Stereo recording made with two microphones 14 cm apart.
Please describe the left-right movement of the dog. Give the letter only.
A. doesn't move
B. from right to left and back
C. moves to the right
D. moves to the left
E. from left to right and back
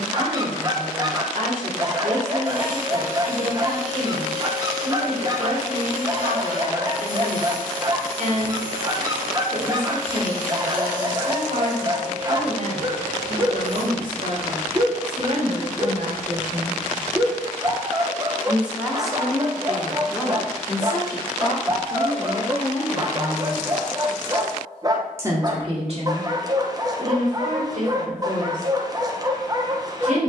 A.